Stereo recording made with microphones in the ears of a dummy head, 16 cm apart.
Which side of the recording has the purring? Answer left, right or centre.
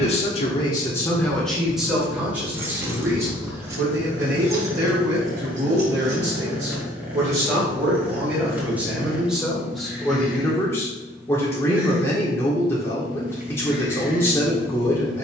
centre.